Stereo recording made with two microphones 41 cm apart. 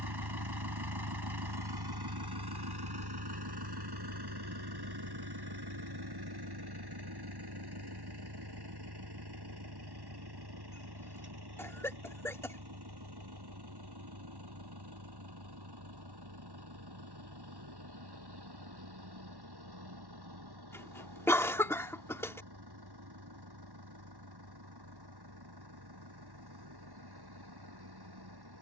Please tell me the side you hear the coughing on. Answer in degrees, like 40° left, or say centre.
10° left.